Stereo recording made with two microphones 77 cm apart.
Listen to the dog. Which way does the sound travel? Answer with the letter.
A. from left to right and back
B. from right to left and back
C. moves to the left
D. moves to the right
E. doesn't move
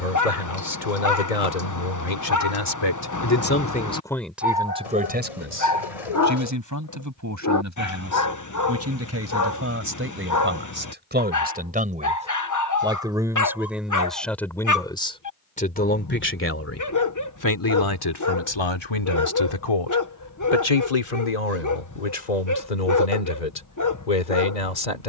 E.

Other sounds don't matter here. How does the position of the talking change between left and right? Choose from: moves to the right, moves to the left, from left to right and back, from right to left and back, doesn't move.
from left to right and back.